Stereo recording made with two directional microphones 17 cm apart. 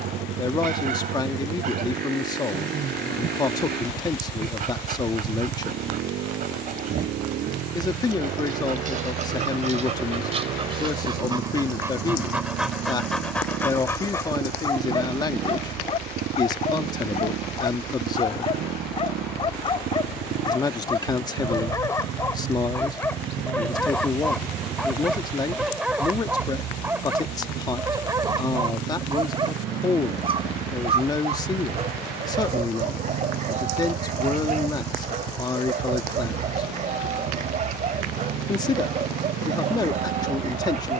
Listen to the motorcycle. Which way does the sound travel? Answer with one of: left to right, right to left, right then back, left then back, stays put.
stays put.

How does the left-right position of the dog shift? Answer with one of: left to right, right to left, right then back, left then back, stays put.
left then back.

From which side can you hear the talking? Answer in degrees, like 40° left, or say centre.
20° left.